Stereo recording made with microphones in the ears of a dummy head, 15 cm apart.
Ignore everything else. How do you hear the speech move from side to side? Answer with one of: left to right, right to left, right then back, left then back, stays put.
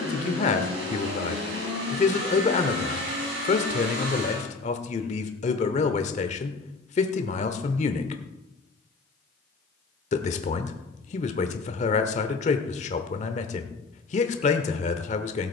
stays put.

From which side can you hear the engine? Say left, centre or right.
right.